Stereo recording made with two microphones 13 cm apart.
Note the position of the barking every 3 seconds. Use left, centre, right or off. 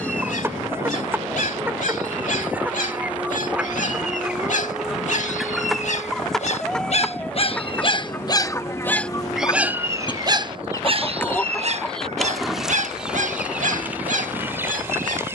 left, left, left, right, right.